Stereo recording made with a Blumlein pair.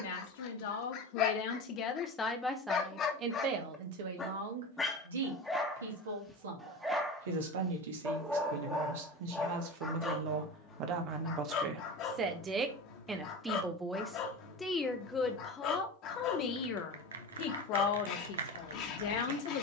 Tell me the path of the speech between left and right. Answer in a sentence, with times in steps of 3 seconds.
In this clip you hear the speech on the left from 0 s, on the right from 3 s, in the centre from 12 s and on the left from 15 s.